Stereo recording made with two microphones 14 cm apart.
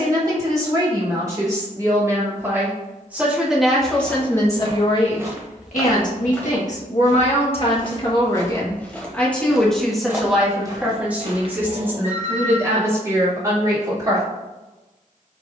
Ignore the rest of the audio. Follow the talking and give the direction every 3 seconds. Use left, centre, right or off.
right, left, left, centre, right.